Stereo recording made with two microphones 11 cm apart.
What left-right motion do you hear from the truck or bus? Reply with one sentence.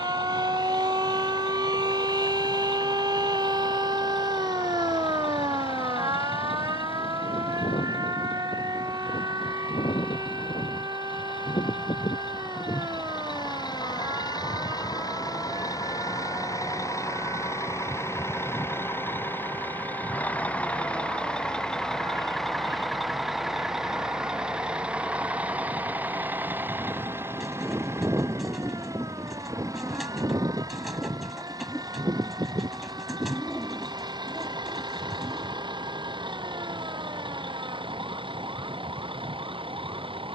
You can hear the truck or bus move to the right.